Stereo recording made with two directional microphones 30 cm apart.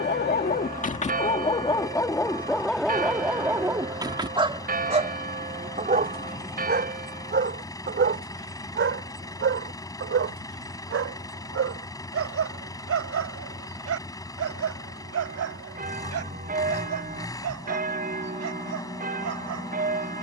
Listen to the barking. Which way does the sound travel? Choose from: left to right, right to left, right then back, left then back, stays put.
left to right.